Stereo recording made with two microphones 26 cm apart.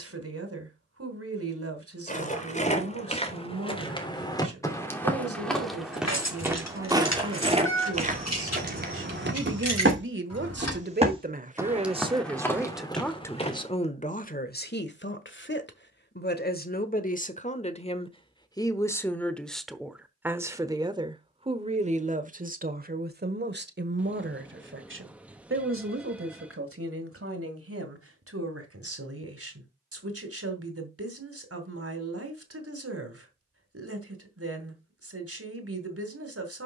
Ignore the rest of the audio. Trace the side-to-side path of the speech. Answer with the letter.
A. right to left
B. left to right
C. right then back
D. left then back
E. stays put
D.